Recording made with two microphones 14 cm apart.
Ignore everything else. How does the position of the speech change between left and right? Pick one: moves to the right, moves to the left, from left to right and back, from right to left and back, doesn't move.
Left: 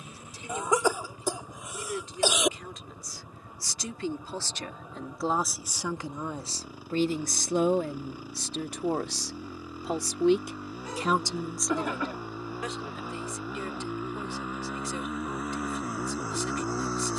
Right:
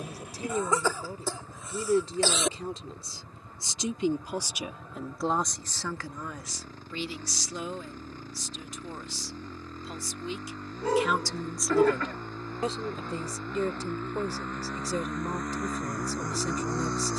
from right to left and back.